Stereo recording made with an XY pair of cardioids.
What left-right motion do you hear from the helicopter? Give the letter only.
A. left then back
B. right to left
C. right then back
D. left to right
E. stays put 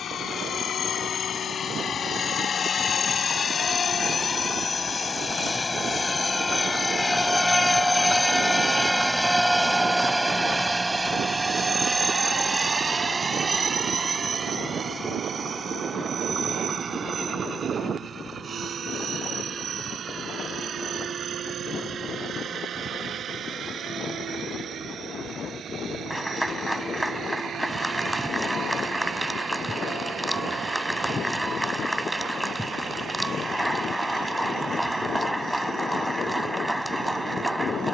D.